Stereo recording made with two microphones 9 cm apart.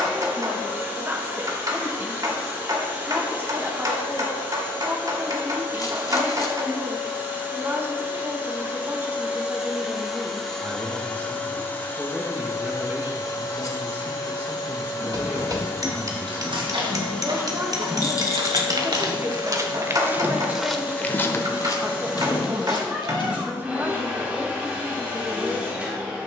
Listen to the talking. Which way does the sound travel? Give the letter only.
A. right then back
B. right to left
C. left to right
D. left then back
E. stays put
E.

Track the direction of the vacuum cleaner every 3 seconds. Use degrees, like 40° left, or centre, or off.
20° right, 20° right, 20° right, centre, 40° left, 20° left, 10° right, 10° right, 10° right.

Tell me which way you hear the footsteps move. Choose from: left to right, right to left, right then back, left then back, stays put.
right to left.